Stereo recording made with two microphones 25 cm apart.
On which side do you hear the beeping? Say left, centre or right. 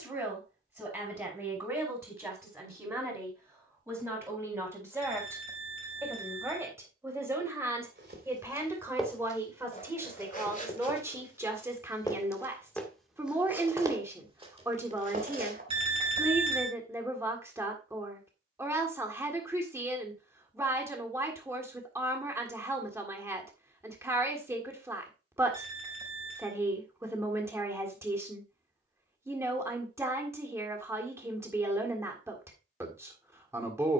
right.